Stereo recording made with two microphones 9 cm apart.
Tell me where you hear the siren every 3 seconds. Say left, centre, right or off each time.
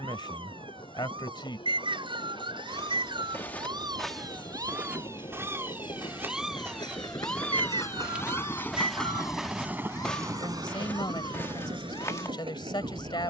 right, right, centre, left, left.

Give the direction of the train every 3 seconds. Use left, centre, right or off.
left, left, left, right, right.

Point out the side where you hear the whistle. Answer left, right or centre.
right.